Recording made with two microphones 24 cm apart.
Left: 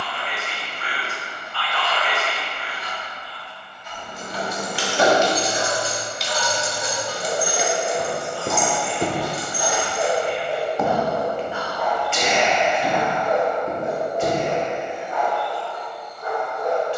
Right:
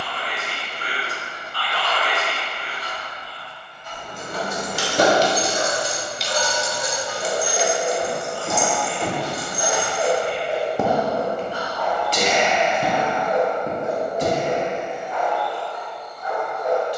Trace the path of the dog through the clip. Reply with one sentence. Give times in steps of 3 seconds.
In this clip you hear the dog on the right from 0 s, in the centre from 9 s and on the left from 12 s.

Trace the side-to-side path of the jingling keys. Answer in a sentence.
In this clip you hear the jingling keys move to the left.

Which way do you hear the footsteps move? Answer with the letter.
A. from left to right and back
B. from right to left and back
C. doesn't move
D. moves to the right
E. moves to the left
D.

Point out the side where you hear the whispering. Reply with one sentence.
In this clip you hear the whispering on the right.